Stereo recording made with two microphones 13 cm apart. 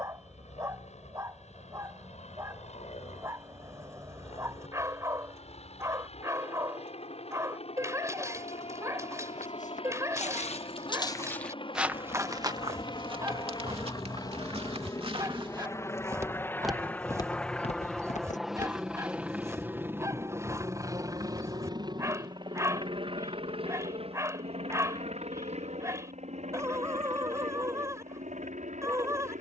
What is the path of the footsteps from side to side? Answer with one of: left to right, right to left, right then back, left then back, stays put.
right then back.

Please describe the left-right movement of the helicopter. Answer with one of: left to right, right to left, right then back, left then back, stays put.
left to right.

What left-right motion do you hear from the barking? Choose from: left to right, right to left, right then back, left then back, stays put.
stays put.